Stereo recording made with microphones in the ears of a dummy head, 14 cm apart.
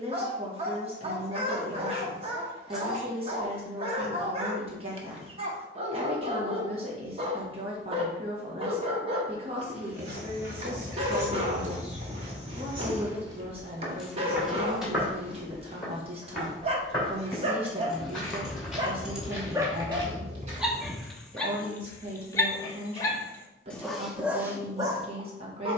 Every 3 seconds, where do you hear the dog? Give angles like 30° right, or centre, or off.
40° right, 40° right, 40° right, 40° right, 40° right, 40° right, 10° right, 10° left, 20° right.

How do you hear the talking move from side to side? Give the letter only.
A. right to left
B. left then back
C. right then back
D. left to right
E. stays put
E.